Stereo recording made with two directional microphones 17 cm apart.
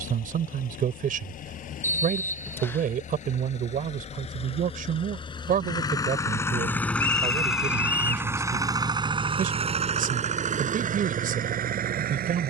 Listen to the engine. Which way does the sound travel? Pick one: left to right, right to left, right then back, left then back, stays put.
left to right.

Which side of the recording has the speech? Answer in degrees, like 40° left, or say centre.
50° right.